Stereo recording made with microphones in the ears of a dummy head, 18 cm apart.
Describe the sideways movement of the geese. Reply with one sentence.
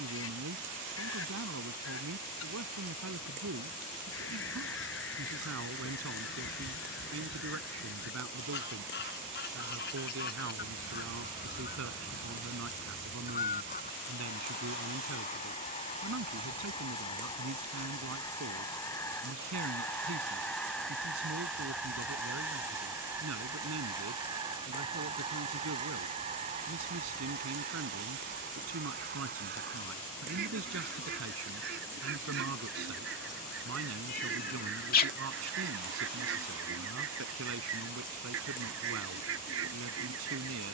You can hear the geese move from left to right.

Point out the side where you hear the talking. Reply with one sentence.
In this clip you hear the talking on the right.